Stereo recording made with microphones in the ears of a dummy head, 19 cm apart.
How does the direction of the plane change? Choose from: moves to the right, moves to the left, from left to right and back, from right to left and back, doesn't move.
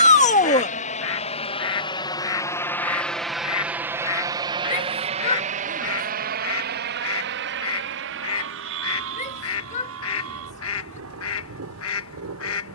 moves to the right.